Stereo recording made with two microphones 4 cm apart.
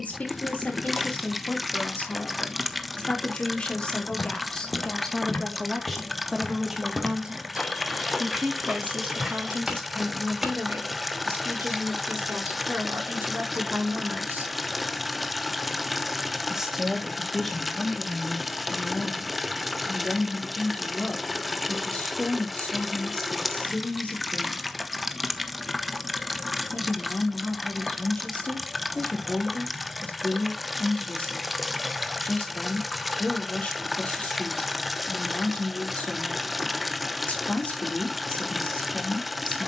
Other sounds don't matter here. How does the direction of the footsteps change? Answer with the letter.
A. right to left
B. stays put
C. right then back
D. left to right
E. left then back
D.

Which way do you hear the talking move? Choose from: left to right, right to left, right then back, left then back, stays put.
right then back.